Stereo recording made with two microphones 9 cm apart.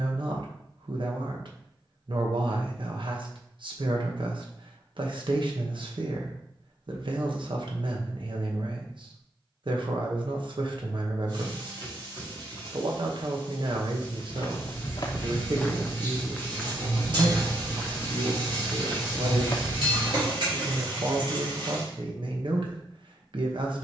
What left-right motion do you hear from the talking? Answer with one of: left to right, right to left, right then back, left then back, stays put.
stays put.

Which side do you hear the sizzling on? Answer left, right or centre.
right.